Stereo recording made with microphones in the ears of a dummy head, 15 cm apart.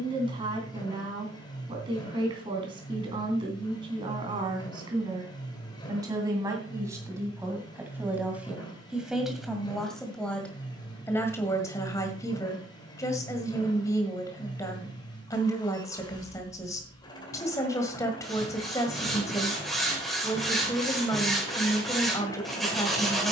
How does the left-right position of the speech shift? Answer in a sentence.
You can hear the speech move from right to left.